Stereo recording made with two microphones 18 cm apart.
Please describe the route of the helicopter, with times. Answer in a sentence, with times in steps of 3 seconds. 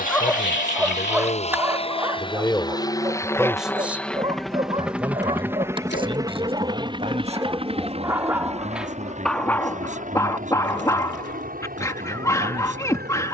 In this clip you hear the helicopter on the left from 0 s, in the centre from 3 s and on the right from 6 s.